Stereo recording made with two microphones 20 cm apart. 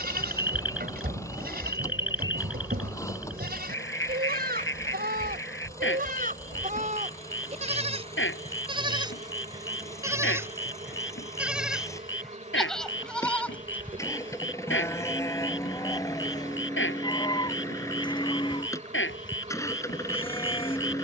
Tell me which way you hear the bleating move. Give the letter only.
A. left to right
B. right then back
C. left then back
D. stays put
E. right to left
E.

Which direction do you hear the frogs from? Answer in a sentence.
In this clip you hear the frogs on the left.